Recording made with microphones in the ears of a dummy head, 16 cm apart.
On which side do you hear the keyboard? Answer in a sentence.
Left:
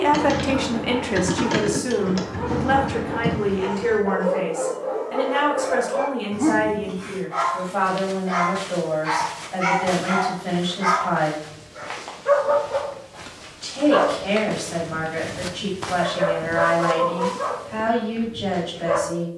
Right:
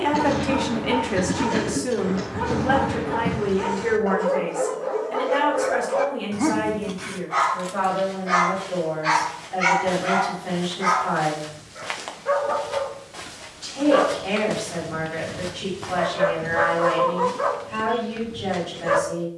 In this clip you hear the keyboard on the left.